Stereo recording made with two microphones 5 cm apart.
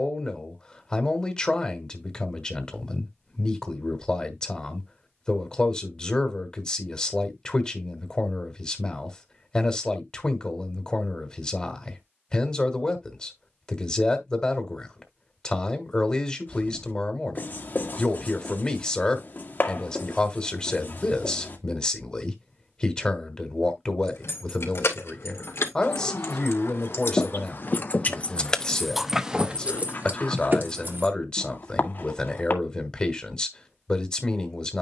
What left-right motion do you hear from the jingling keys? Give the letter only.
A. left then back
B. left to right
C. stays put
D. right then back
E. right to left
B.